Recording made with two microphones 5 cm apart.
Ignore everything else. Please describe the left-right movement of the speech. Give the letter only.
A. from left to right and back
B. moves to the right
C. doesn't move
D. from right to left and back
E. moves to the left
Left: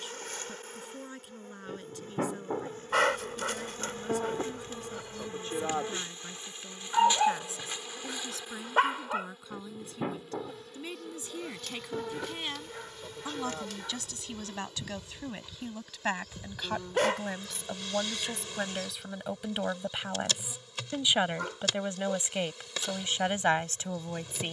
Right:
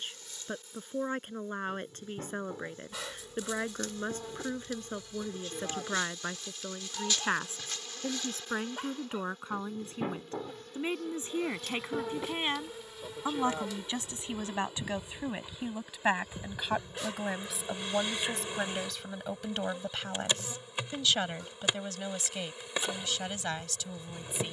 E.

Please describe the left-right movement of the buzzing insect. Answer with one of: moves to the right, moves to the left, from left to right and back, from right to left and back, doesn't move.
moves to the right.